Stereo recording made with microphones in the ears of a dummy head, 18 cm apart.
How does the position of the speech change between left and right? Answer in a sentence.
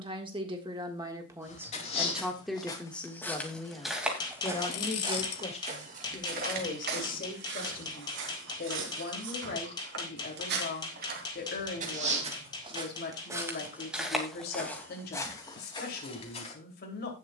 You can hear the speech move from right to left.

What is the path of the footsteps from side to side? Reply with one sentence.
You can hear the footsteps move from left to right and back again.